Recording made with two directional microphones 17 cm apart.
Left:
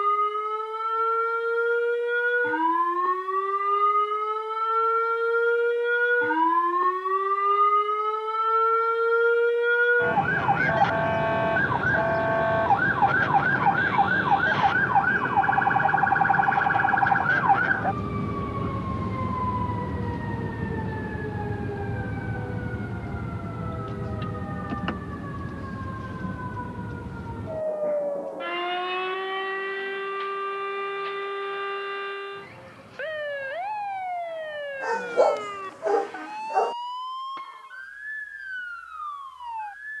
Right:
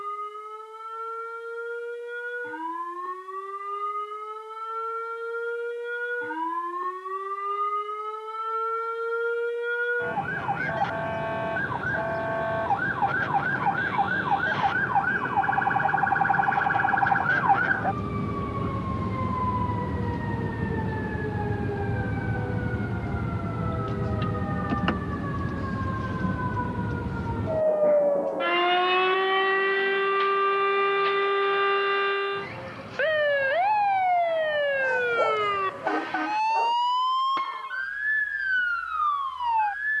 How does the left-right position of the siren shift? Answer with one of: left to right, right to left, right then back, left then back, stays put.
left to right.